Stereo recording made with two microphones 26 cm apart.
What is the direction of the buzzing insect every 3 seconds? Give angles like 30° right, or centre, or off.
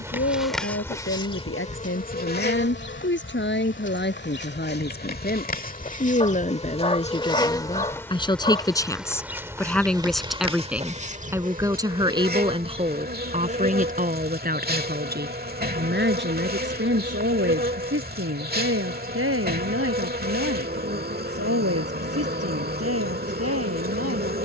20° left, 40° left, 10° left, 20° right, 40° right, 40° right, 40° right, 40° right.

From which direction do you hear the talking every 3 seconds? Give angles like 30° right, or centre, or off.
50° left, 40° left, 20° left, centre, 30° right, 50° right, 60° right, 70° right.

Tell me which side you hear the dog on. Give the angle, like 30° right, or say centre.
20° left.